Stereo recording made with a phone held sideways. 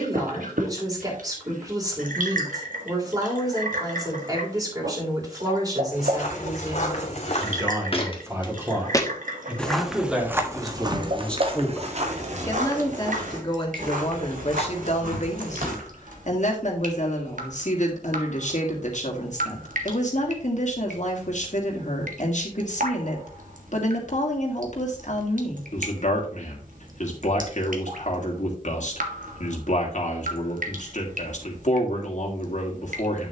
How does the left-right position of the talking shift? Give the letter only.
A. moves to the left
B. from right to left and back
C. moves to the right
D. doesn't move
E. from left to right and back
A.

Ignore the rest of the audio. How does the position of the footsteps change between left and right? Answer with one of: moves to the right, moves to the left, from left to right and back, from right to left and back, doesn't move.
moves to the right.